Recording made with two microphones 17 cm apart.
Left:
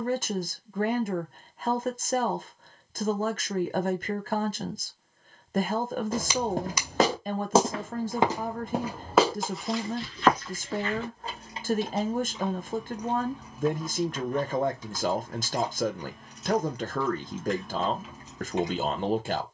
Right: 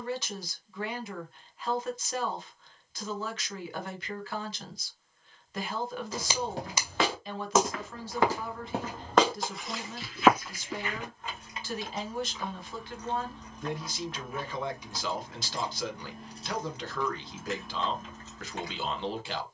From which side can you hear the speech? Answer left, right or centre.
left.